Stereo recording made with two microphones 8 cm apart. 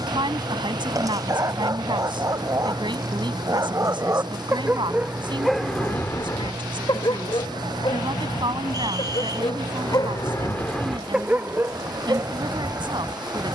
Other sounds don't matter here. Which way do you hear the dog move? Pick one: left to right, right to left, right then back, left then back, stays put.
left then back.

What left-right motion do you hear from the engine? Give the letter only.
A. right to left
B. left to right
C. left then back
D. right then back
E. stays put
E.